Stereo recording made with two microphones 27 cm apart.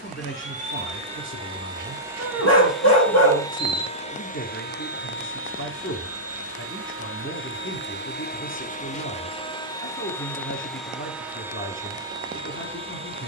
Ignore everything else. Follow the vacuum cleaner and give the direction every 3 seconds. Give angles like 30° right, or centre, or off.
20° right, 30° left, 40° left, 10° left, 20° right.